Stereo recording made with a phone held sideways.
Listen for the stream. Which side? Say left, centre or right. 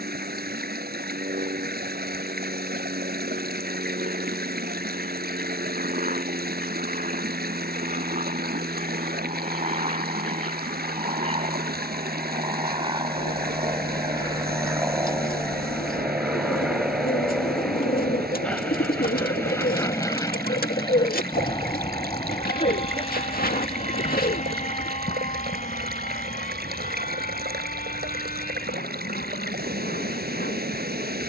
right.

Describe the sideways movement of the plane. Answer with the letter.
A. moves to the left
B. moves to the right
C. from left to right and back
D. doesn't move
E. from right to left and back
A.